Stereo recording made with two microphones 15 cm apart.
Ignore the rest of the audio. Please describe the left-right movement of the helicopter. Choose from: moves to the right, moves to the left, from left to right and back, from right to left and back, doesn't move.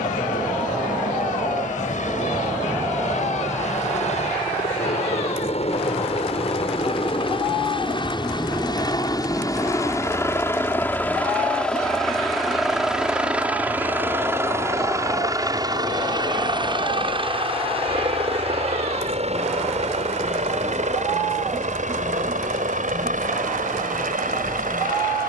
moves to the right.